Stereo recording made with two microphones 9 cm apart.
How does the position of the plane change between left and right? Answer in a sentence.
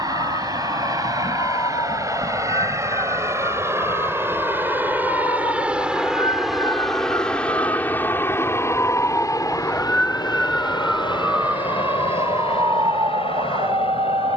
In this clip you hear the plane move to the left.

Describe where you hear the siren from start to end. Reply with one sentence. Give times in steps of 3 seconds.
In this clip you hear the siren on the left from 0 s, in the centre from 9 s and on the right from 12 s.